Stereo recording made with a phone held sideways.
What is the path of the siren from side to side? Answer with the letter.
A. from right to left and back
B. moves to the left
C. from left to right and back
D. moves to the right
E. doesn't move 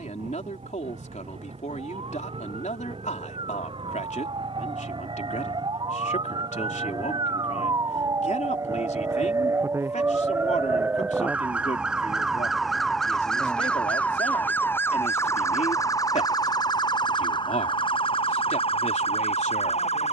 B.